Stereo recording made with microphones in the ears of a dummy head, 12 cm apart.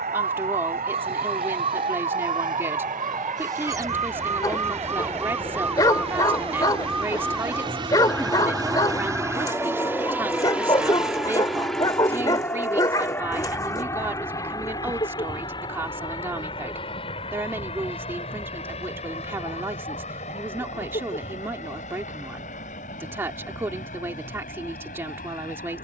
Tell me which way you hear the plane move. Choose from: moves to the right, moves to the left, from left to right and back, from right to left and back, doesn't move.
moves to the left.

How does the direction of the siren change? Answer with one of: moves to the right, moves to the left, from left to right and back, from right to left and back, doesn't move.
moves to the left.